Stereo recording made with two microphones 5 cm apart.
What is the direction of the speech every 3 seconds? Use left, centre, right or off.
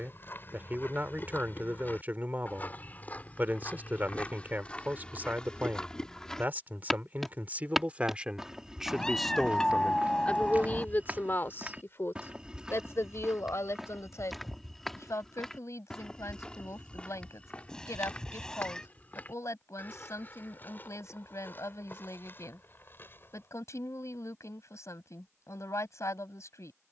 right, right, right, left, left, left, left, left, left.